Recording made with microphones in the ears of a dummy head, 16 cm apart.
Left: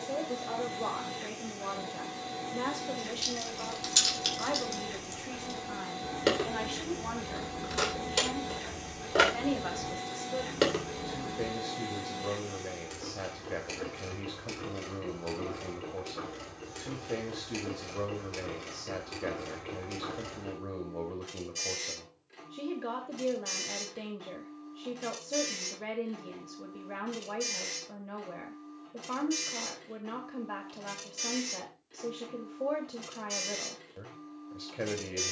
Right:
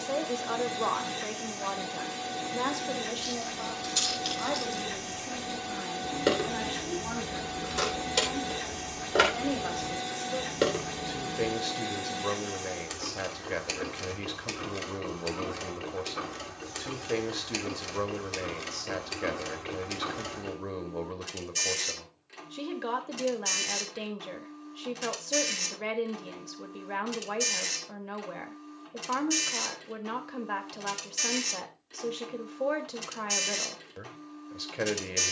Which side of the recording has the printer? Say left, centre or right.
right.